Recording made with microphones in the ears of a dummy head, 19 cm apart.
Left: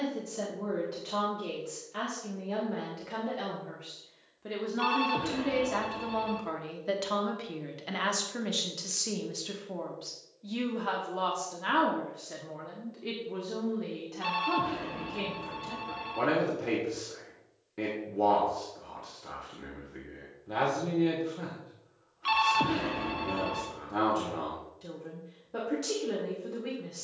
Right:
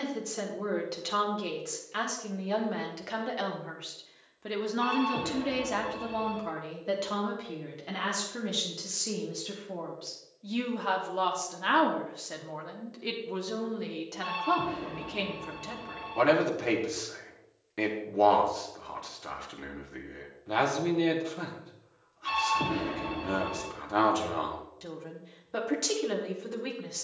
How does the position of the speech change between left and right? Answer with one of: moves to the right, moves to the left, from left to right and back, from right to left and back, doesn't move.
from right to left and back.